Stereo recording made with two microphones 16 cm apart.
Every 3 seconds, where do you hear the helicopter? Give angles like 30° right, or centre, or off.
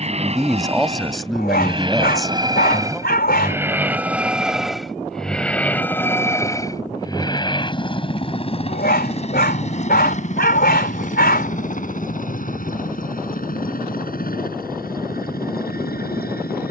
30° right, centre, 30° left, 50° left, 60° left, 60° left.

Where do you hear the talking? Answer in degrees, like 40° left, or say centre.
centre.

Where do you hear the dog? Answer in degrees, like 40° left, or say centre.
80° left.